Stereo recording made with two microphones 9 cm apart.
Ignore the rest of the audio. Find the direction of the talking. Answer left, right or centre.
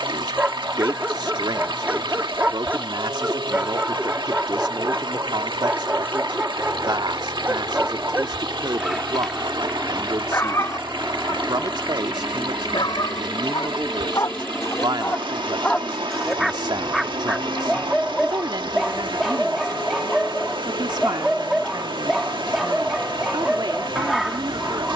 right.